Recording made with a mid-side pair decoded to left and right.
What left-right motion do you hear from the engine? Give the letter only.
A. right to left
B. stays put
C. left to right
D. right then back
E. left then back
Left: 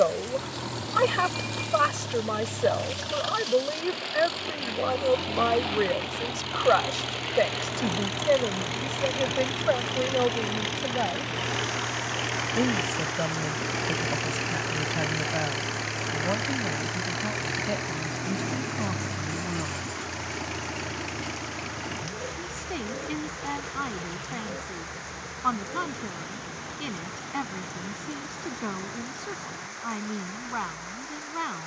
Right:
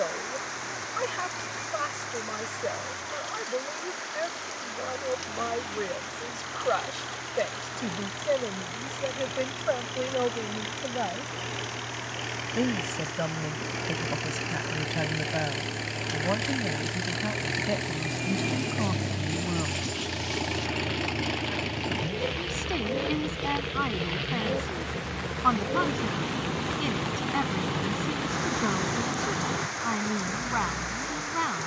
C.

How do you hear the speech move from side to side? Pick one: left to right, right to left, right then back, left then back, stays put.
left to right.